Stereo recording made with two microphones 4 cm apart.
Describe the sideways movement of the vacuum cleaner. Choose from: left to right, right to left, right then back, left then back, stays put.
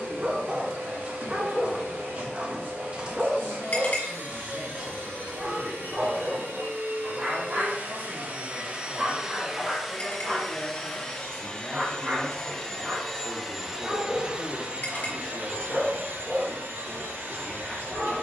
left then back.